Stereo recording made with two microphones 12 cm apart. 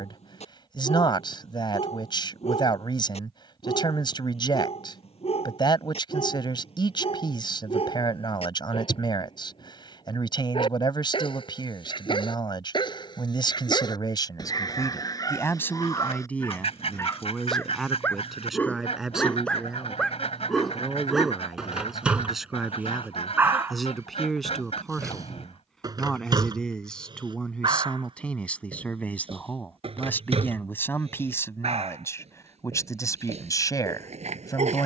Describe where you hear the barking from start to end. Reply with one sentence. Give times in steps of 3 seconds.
In this clip you hear the barking on the left from 0 s, in the centre from 18 s and on the right from 24 s.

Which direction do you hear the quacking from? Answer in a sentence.
You can hear the quacking on the left.